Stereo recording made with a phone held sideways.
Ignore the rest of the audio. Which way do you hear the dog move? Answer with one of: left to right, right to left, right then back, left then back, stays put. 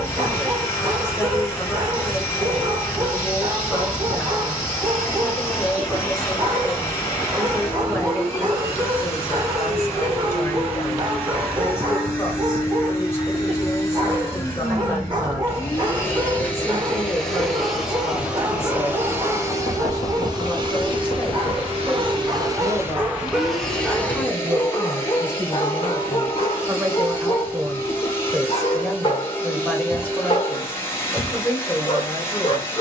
right to left.